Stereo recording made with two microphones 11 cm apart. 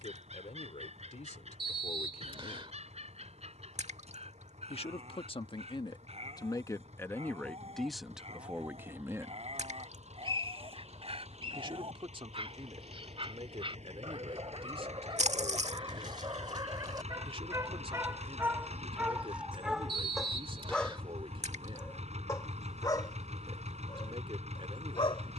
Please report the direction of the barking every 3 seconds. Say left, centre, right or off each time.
right, right, right, right, right, right, centre, left, left.